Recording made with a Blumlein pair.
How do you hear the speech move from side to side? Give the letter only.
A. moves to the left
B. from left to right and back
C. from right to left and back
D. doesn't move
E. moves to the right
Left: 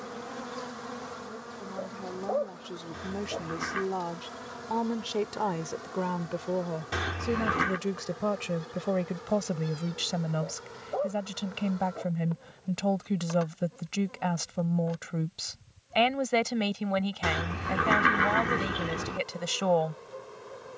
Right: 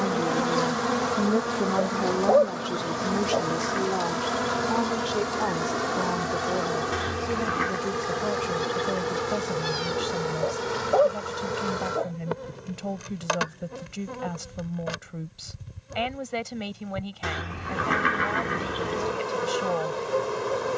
A.